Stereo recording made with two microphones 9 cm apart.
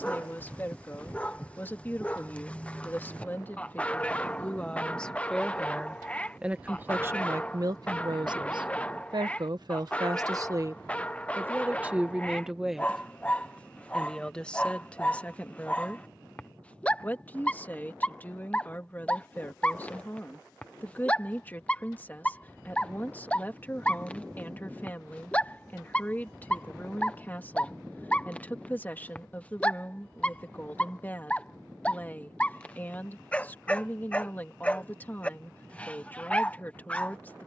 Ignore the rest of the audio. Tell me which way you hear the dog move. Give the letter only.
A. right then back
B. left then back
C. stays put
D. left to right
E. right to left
C.